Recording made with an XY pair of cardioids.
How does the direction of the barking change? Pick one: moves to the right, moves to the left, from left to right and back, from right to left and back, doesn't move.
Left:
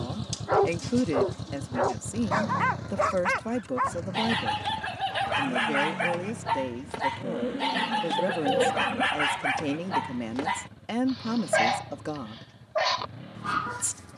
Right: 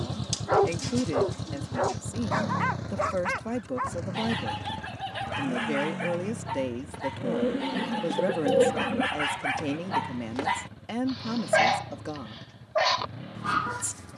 from right to left and back.